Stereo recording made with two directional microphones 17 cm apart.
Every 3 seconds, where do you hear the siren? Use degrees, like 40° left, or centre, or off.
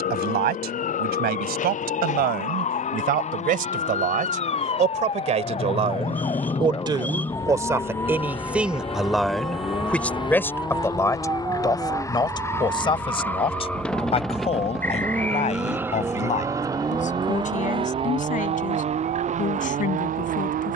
50° left, 40° left, 20° left, 10° right, 30° right, 50° right, 60° right.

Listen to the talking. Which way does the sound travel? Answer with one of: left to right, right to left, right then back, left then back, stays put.
right to left.